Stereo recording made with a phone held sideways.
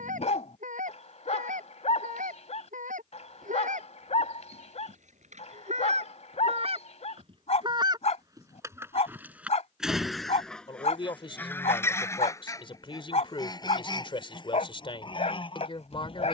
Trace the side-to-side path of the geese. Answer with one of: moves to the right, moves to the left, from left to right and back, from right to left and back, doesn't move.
moves to the left.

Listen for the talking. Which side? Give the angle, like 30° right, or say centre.
40° left.